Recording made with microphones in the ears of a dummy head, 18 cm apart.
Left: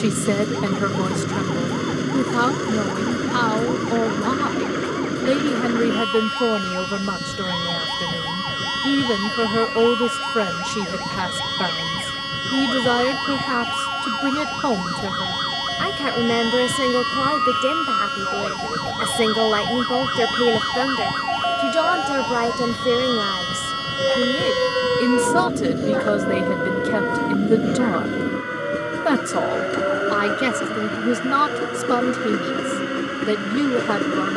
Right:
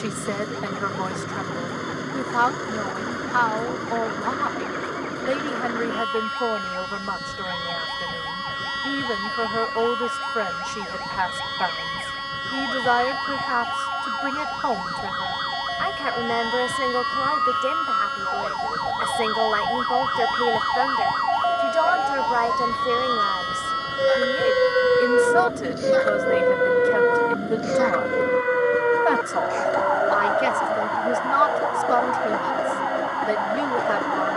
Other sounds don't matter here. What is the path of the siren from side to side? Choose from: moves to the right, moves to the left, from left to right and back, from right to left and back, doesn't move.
moves to the right.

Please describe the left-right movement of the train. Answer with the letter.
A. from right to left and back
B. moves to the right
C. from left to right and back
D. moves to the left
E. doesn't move
E.